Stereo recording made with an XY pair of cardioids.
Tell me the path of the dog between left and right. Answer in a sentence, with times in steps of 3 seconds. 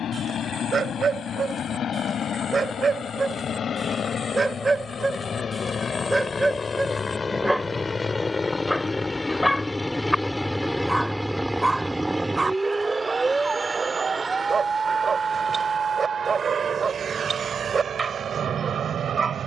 You can hear the dog on the right from 0 s, in the centre from 6 s and on the right from 12 s.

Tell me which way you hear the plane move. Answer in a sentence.
In this clip you hear the plane go from the left side to the right.